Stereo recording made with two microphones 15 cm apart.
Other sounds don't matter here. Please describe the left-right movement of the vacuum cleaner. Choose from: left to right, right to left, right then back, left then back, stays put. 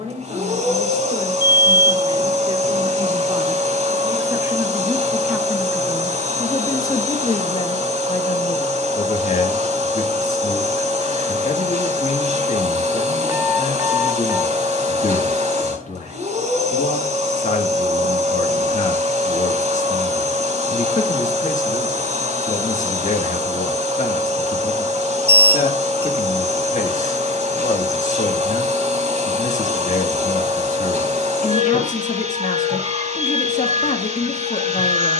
stays put.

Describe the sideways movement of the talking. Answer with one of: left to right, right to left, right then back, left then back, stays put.
right to left.